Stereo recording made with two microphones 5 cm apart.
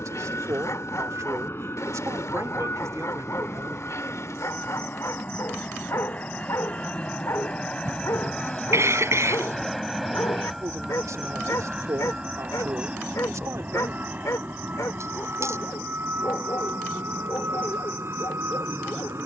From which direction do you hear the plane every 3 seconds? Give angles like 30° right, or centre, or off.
50° left, 40° left, 20° left, centre, 30° right, 40° right, 50° right.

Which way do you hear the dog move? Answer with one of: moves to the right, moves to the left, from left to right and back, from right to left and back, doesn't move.
doesn't move.